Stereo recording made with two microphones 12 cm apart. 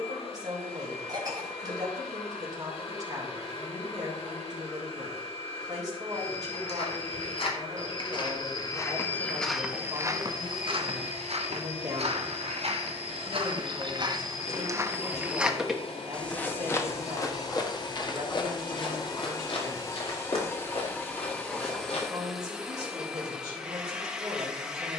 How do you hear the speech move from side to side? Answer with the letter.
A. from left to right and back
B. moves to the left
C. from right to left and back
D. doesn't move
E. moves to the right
D.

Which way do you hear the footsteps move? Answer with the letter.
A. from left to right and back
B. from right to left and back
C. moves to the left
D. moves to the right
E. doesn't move
A.